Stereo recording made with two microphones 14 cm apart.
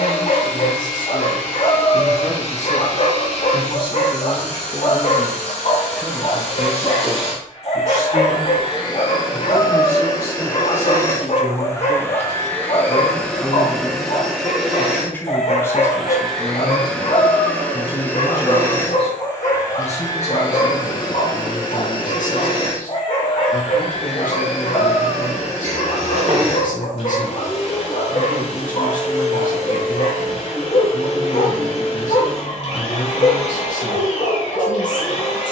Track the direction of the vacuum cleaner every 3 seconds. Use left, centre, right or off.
left, left, left, left, centre, centre, left, left, left, left, left, left.